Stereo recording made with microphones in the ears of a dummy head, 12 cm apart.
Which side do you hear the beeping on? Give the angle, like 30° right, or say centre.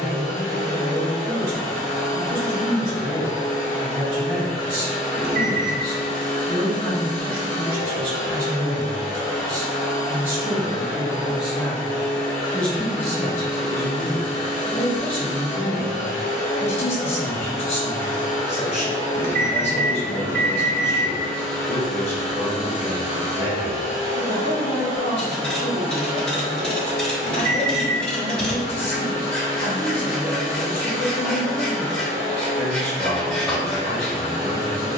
70° right.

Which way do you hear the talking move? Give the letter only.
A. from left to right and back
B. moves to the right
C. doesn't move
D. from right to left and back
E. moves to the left
E.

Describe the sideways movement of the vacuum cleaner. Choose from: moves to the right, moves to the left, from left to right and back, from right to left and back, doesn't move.
moves to the right.